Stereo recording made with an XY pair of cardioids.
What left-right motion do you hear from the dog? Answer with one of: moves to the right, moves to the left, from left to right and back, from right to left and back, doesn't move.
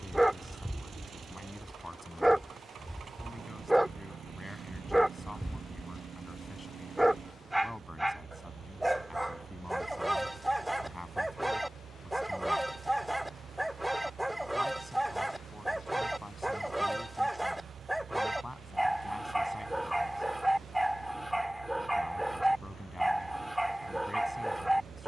doesn't move.